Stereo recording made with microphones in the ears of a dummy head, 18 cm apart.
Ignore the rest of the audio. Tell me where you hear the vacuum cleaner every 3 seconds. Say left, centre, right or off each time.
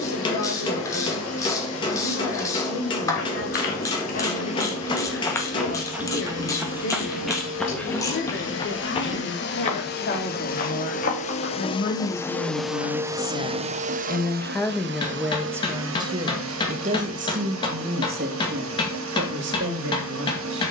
left, left, left, left, right, right, right.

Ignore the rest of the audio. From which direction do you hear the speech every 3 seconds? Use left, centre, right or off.
left, left, left, left, left, right, right.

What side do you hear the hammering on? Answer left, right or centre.
left.